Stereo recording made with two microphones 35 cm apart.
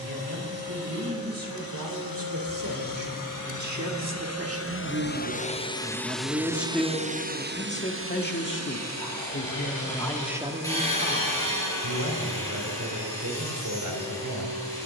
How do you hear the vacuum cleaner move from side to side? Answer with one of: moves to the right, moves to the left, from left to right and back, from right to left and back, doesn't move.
moves to the right.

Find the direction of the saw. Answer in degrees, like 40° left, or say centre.
10° left.